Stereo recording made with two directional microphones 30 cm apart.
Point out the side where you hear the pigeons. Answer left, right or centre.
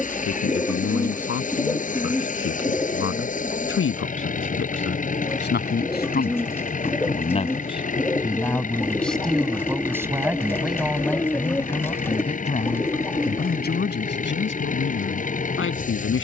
centre.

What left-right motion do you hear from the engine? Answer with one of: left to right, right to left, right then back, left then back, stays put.
stays put.